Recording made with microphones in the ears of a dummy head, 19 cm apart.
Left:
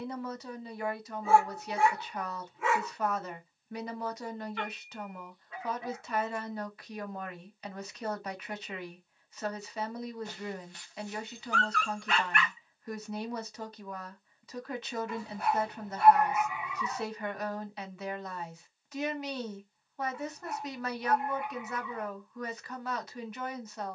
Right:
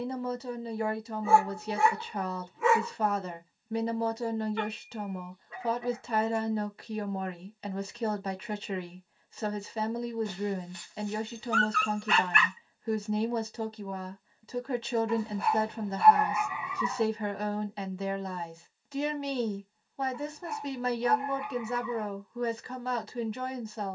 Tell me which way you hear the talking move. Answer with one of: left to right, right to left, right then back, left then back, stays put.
stays put.